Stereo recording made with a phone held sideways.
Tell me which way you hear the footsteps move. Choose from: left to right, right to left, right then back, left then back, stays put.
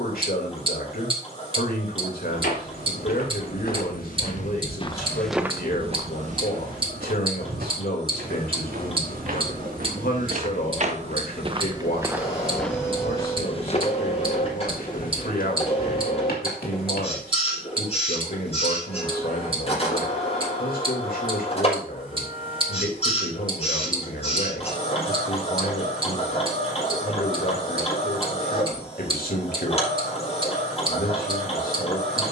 right then back.